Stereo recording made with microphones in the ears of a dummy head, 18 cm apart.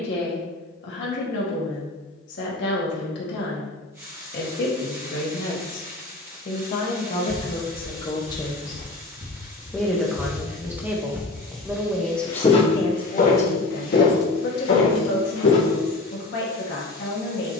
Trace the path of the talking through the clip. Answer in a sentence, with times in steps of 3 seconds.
You can hear the talking on the left from 0 s, in the centre from 9 s and on the left from 12 s.